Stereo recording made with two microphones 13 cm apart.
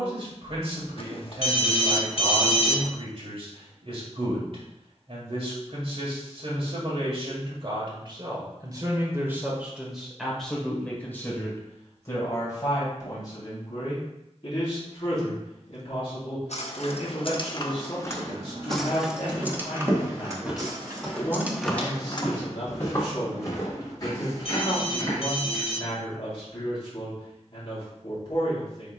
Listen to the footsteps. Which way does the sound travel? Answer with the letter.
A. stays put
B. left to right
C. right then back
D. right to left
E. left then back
D.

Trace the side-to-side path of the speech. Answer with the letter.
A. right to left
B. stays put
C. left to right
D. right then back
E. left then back
A.